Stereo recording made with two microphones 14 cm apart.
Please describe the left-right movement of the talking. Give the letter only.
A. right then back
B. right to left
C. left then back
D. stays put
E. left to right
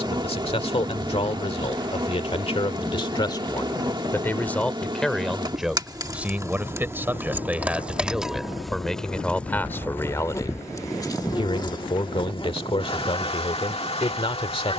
A.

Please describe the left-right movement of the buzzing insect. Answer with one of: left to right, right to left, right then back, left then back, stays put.
right to left.